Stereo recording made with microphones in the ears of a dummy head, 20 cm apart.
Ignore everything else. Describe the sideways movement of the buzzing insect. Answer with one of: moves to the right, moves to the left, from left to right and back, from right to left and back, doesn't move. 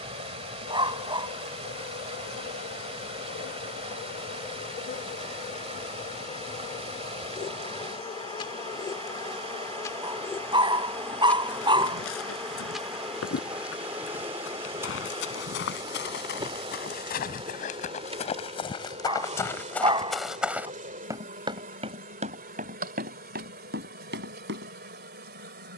moves to the right.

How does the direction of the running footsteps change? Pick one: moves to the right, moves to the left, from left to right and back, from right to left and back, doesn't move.
moves to the right.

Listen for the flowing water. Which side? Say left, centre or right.
right.